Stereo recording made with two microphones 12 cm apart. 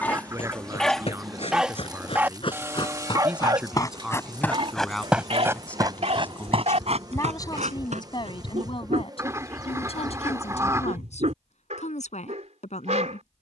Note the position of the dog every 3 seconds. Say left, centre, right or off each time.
centre, right, right, right, right.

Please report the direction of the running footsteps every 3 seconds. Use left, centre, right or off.
left, centre, right, off, off.